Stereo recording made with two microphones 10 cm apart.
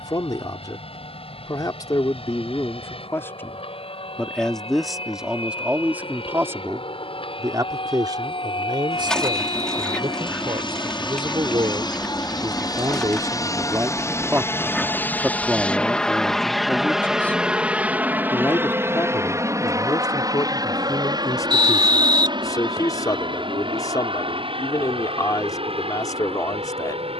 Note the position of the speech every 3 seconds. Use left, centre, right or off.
left, centre, right, right, right, centre, left, left, left.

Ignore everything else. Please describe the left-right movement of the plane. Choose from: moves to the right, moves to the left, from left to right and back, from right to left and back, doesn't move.
moves to the right.